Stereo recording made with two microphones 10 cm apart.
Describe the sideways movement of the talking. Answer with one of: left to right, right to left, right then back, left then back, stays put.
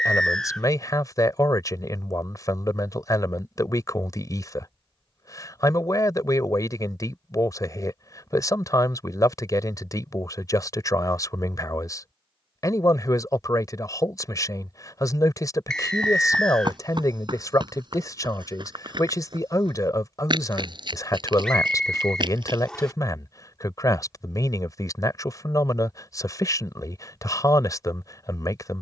stays put.